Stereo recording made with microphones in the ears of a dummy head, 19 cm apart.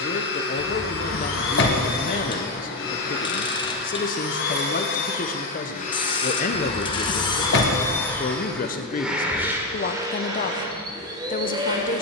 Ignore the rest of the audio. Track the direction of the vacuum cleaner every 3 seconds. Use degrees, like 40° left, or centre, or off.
60° left, 50° left, 20° left, 20° right.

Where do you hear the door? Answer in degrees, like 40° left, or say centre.
50° left.